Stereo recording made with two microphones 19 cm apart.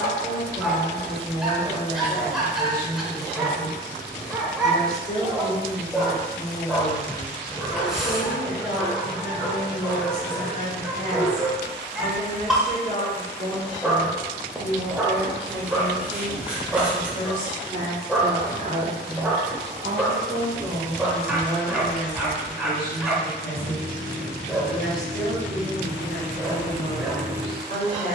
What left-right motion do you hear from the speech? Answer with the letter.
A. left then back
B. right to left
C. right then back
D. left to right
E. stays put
C.